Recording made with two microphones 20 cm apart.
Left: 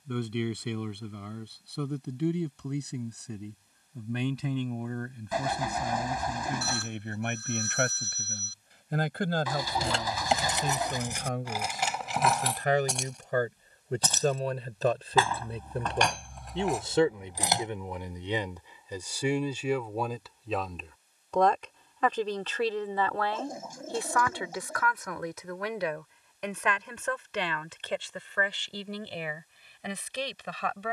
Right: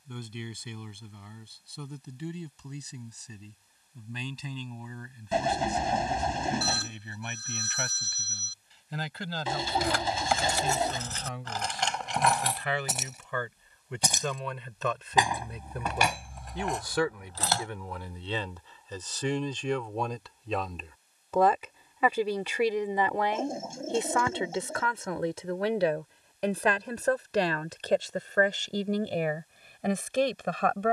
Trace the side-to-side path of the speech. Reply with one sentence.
You can hear the speech move to the right.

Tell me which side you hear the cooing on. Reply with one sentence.
In this clip you hear the cooing on the right.